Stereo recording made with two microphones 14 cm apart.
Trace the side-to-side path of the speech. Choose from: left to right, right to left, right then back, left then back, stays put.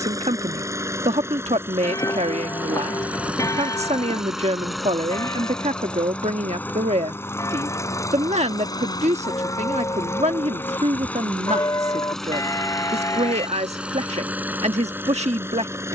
stays put.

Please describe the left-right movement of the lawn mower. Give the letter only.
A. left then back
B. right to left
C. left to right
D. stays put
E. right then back
A.